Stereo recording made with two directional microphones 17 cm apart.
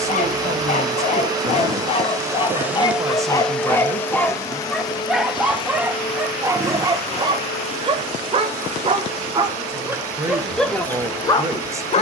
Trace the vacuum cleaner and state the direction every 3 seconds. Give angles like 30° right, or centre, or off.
20° right, 20° left, 40° left, 40° left.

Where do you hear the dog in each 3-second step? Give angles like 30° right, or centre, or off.
40° left, 10° left, 20° right, centre.